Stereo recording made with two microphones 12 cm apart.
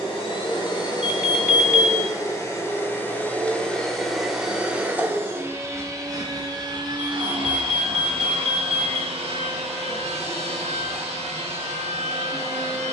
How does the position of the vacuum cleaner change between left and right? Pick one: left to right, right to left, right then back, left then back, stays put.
left to right.